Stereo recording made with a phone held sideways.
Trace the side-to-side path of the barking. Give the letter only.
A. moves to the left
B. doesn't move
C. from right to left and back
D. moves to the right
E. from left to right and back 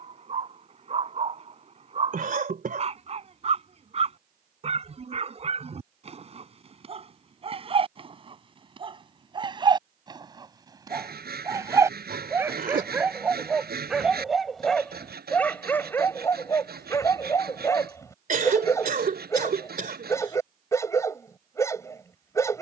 A.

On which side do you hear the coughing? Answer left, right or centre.
right.